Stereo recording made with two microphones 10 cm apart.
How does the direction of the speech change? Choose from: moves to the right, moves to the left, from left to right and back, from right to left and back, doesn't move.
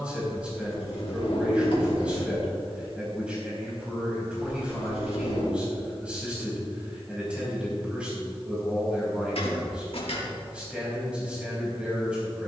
doesn't move.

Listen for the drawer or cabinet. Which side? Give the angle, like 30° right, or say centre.
70° left.